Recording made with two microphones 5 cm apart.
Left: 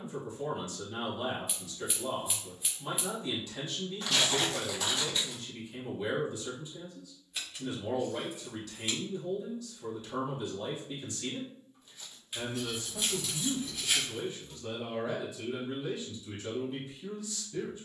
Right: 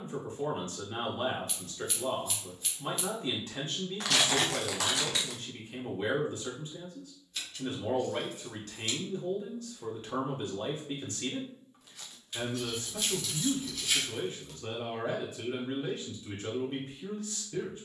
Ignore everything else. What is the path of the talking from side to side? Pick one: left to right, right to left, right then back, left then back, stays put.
stays put.